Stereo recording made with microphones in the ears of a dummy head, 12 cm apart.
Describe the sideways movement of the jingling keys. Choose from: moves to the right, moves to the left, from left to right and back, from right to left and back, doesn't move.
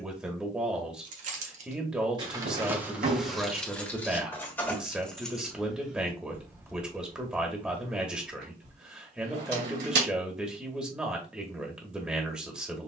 from right to left and back.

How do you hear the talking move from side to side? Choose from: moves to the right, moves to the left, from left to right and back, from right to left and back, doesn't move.
doesn't move.